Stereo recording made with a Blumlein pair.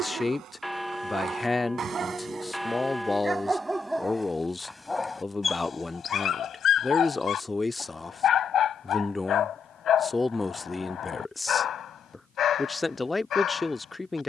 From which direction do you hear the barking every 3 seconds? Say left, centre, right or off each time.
right, centre, left, left, left.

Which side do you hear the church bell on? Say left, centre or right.
centre.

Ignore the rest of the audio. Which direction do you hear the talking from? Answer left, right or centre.
centre.